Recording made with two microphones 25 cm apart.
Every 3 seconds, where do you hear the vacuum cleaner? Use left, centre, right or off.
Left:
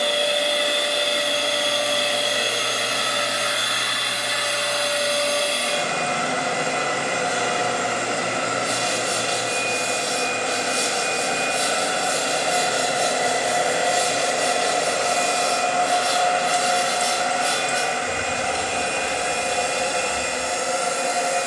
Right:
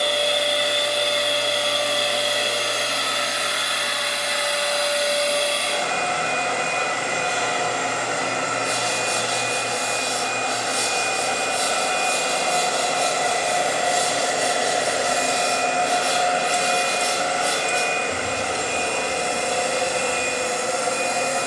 left, left, left, left, centre, right, right.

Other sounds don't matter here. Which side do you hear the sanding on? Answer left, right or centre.
left.